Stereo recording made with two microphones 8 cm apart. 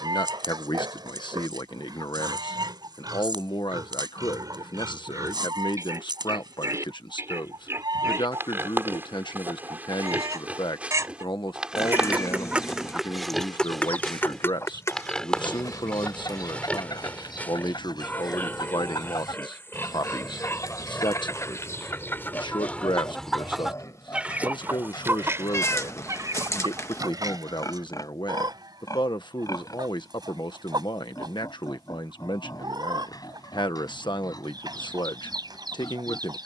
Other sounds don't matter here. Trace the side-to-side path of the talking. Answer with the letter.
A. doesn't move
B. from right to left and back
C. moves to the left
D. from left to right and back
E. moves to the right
A.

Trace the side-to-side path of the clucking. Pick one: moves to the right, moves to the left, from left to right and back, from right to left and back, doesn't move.
from right to left and back.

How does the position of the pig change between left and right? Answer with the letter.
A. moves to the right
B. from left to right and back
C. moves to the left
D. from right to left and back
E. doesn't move
C.